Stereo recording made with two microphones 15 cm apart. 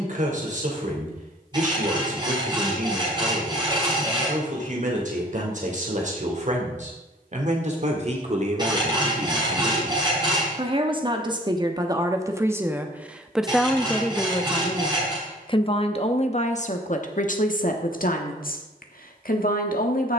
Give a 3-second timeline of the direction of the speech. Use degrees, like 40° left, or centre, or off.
50° right, 50° right, 50° right, 30° right, centre, 50° left, 70° left.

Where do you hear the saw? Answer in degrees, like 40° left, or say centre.
30° right.